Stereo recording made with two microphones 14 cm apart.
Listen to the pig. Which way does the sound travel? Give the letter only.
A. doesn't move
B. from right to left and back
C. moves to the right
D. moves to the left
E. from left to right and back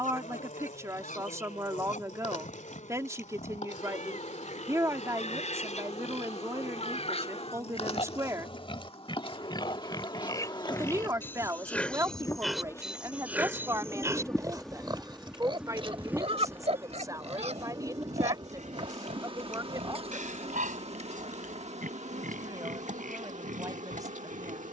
C.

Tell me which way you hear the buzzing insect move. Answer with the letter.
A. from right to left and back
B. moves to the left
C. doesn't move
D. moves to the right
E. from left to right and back
D.